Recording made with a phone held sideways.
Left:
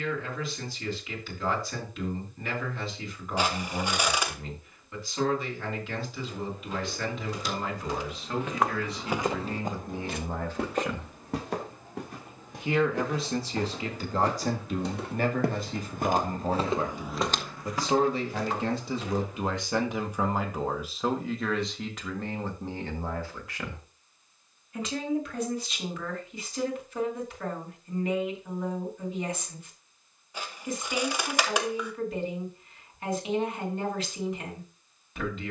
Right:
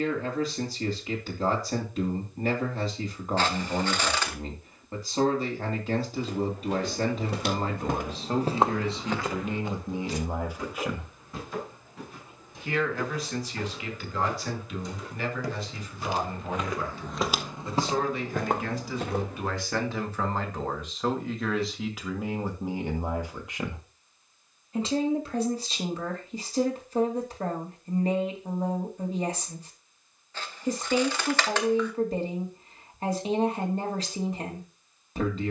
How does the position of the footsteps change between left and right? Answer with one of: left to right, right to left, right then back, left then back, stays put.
left then back.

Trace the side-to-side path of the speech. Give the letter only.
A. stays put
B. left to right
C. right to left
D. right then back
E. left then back
E.